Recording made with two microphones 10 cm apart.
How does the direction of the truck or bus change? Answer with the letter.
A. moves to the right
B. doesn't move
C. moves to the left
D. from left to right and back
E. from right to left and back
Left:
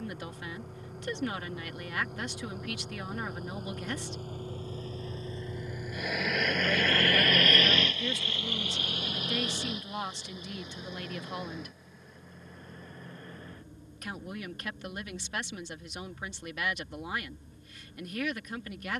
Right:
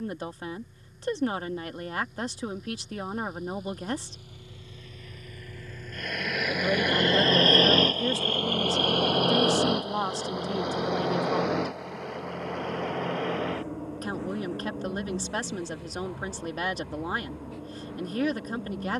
A.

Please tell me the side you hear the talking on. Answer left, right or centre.
right.